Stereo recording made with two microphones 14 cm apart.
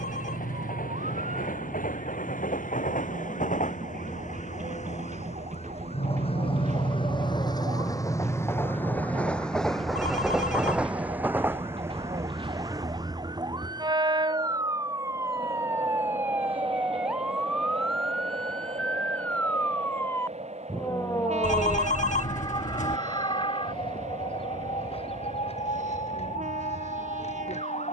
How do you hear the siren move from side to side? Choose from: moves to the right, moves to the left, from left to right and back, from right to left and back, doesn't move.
moves to the left.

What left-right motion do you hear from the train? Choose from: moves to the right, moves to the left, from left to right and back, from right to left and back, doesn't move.
moves to the right.